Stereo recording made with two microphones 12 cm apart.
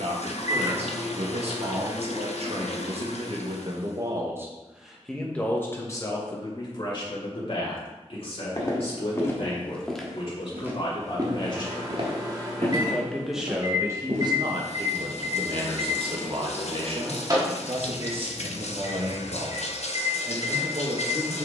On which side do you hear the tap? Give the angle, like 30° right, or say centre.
70° left.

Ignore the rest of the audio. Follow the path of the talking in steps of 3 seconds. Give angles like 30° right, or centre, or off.
60° right, 20° right, 40° left, 50° left, 20° right, 50° right, 50° right.